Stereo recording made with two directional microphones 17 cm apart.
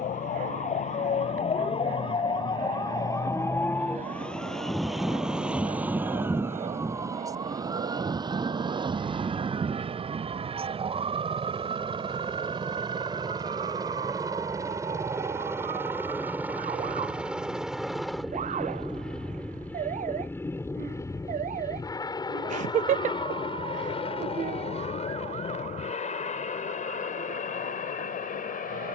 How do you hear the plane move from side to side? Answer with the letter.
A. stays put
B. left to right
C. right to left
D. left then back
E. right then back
C.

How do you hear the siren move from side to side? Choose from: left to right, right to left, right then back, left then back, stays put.
left to right.